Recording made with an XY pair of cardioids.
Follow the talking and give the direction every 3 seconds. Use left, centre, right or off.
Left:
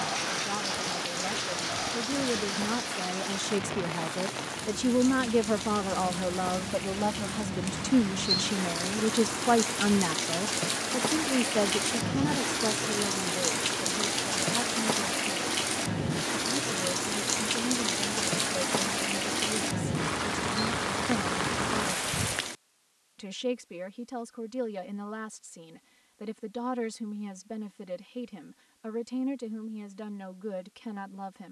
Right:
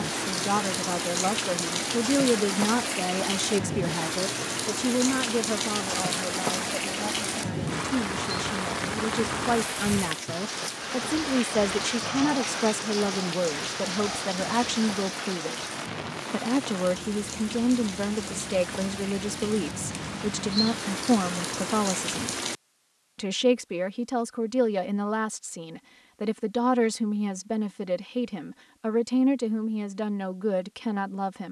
right, centre, left, centre, right, right, right, right, right, right, right.